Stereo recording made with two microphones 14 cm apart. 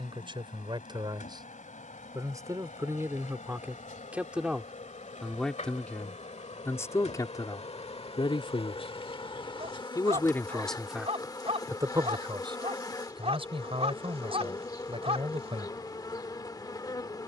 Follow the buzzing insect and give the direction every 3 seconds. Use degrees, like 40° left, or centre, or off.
60° left, 60° left, 50° left, 30° left, 30° left, 30° left.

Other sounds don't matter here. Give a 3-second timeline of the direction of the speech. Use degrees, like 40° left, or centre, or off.
30° right, 10° right, 30° left, centre, 40° right, 40° right.